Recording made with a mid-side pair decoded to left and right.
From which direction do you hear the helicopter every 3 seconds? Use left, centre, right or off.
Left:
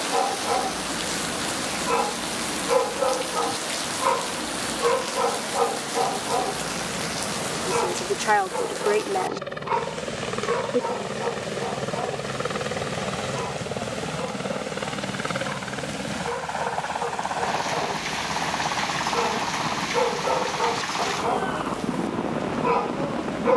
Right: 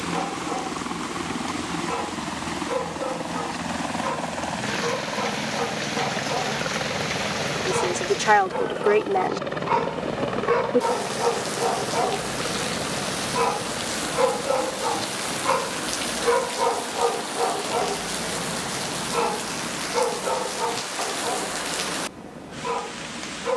right, right, right, centre, left, left, left, left.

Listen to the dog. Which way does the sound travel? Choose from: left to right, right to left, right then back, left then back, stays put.
right then back.